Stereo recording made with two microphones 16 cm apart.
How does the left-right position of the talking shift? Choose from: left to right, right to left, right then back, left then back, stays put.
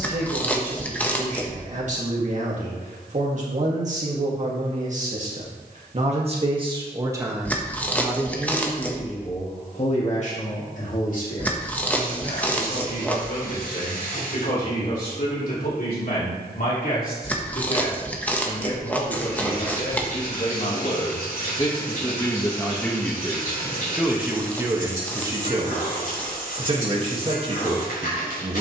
left then back.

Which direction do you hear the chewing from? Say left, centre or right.
centre.